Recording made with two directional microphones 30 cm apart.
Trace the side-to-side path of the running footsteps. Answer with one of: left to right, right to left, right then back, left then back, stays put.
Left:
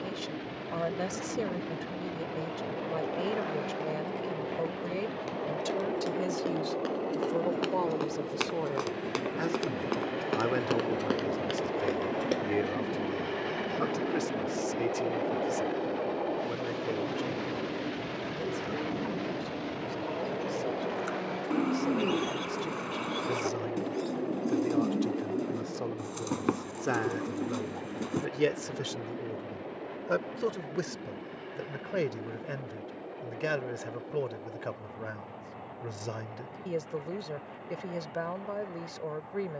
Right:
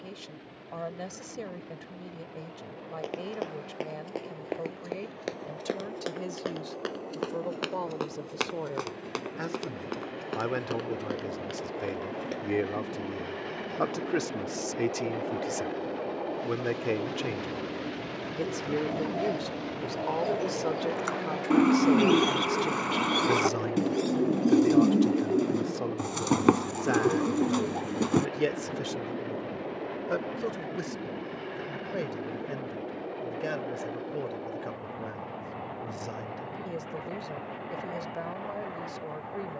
right to left.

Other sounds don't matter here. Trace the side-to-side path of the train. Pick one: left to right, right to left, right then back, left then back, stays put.
left to right.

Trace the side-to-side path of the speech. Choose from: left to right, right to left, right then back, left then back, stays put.
right then back.